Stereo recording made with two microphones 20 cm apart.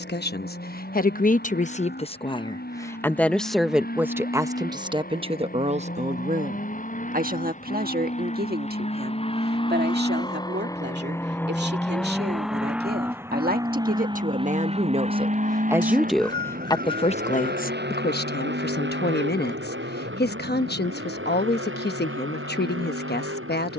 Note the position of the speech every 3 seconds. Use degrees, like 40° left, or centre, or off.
40° left, 10° right, 50° right, 60° right, 50° right, 10° left, 60° left, 60° left.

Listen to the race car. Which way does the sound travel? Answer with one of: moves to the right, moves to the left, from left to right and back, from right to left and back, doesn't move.
moves to the right.